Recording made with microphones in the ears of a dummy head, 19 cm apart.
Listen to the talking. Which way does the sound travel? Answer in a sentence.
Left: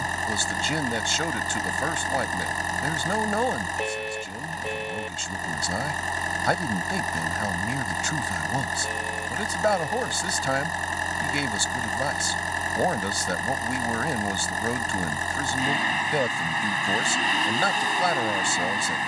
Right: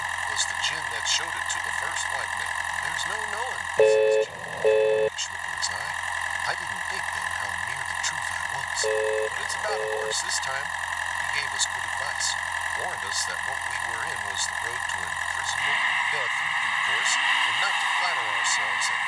In this clip you hear the talking stay in one place.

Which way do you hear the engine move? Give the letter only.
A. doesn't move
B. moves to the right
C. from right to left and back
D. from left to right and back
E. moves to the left
A.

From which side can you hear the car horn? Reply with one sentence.
You can hear the car horn on the right.